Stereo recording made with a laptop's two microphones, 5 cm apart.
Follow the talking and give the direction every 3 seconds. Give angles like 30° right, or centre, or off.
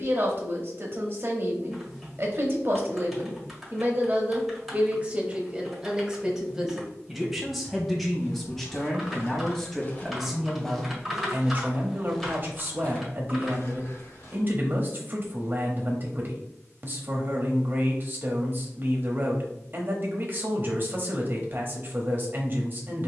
40° right, 30° right, centre, 10° right, 40° right, 40° right, 40° right, 40° right.